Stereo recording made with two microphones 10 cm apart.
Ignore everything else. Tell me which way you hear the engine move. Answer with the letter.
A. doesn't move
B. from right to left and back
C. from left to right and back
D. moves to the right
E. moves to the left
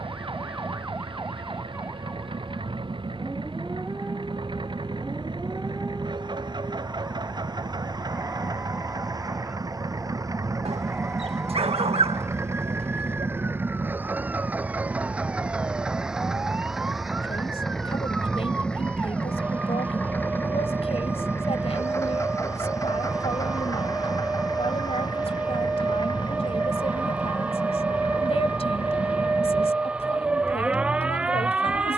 E.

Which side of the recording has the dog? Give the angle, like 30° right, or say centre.
80° right.